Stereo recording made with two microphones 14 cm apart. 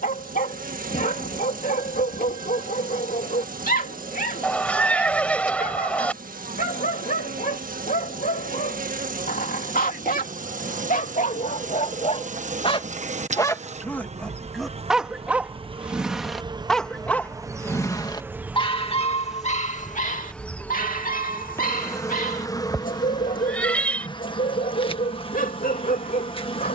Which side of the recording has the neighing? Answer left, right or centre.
centre.